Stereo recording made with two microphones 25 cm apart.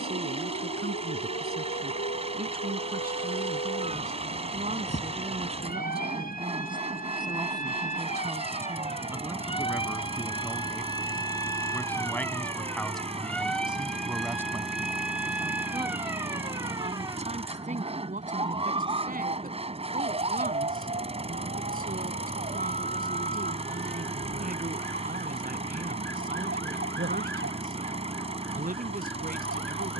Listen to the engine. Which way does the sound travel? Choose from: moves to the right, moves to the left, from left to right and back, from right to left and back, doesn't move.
doesn't move.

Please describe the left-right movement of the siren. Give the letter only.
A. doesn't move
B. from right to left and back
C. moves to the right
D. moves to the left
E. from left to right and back
C.